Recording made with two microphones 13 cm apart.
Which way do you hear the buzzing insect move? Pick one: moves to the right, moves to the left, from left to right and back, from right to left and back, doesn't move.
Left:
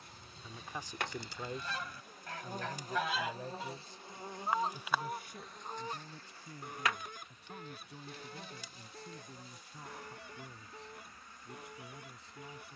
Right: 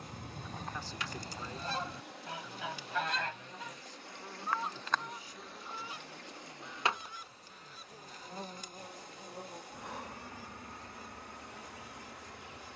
moves to the right.